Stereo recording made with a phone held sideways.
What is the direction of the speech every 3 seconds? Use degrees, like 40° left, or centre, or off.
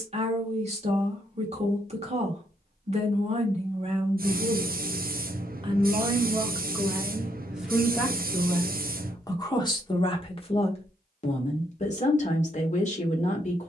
40° right, 40° right, 10° right, 30° left, 50° left.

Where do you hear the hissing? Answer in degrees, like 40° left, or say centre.
60° right.